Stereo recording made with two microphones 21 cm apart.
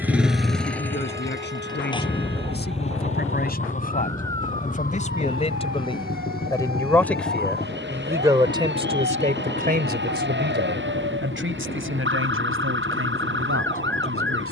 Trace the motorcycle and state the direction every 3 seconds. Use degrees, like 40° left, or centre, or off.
10° left, 40° left, 40° left, 50° left, 50° left.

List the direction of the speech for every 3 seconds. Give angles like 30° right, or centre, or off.
50° left, 30° left, 10° right, 50° right, 70° right.